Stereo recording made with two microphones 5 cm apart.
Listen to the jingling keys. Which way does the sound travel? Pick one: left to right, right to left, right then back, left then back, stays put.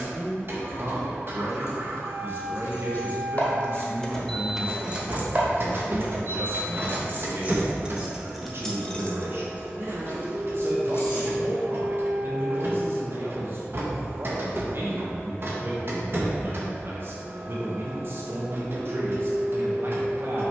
right then back.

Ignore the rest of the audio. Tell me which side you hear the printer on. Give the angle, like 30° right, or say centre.
50° right.